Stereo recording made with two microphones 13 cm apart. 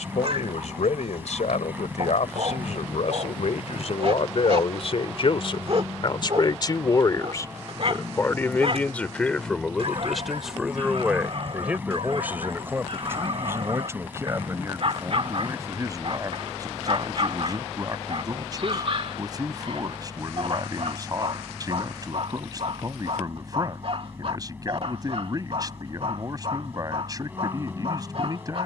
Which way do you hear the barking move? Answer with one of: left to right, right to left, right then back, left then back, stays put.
stays put.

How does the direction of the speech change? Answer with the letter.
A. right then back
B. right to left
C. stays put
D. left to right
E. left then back
D.